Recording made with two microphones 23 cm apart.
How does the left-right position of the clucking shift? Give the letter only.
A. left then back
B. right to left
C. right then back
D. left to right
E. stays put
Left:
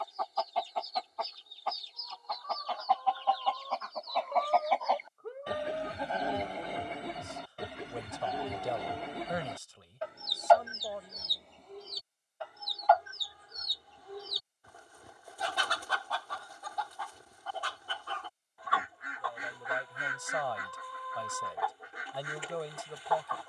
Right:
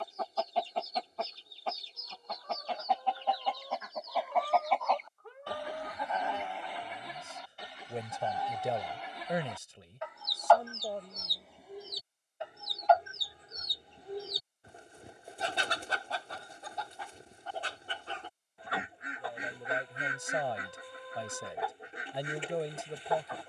A.